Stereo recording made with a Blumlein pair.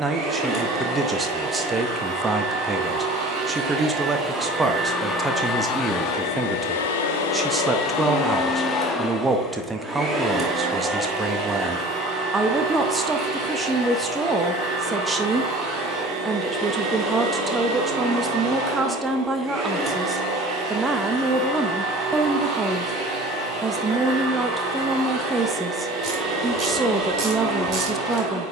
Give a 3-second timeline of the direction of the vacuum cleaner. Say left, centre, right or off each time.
right, centre, left, centre, right, right, right, right, right, right.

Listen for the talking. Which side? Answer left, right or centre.
centre.